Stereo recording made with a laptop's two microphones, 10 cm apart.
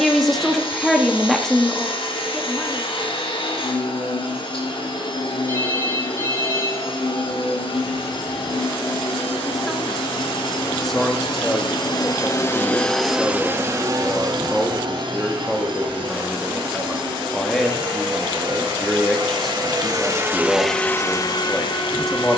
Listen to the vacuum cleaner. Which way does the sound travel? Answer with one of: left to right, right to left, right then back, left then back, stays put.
right then back.